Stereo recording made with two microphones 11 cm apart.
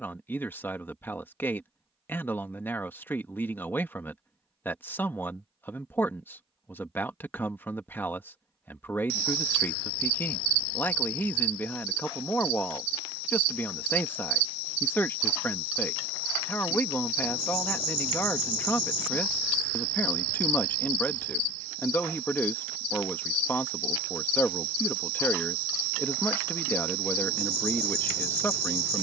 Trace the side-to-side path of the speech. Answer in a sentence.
In this clip you hear the speech stay in one place.